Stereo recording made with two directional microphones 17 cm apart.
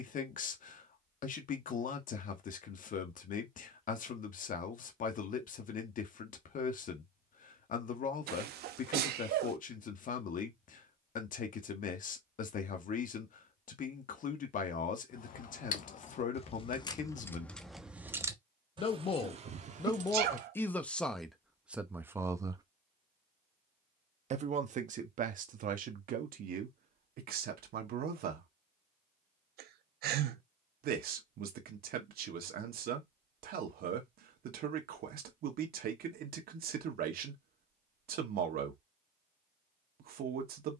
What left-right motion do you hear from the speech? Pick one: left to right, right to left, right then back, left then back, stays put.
left to right.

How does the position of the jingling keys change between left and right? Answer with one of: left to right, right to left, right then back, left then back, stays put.
left to right.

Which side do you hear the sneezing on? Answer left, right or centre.
right.